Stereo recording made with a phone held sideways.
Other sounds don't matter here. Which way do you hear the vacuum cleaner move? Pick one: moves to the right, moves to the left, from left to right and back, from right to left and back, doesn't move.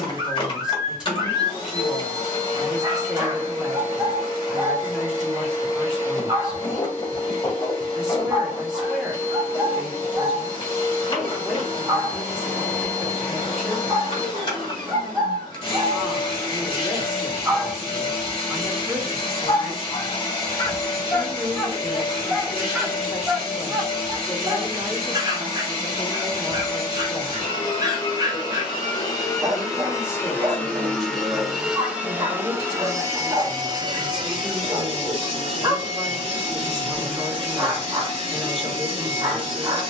moves to the right.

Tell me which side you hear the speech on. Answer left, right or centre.
centre.